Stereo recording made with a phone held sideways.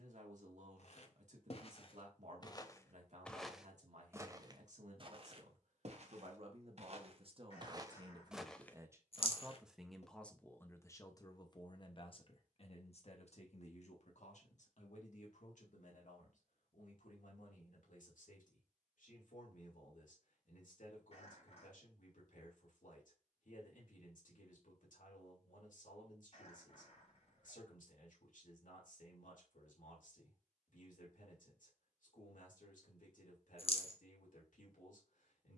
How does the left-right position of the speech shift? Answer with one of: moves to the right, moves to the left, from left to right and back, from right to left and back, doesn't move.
moves to the left.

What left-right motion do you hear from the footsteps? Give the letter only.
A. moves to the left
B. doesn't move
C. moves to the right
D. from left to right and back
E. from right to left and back
D.